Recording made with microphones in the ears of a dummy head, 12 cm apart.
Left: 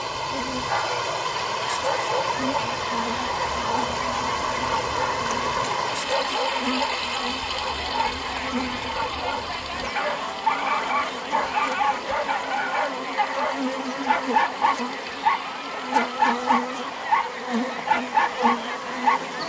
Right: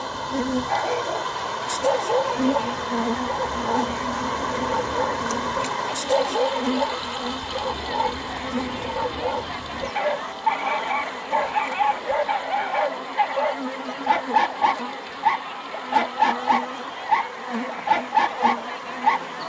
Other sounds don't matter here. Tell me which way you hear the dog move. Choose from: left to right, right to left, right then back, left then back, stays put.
stays put.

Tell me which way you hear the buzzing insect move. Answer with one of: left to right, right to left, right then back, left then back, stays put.
right to left.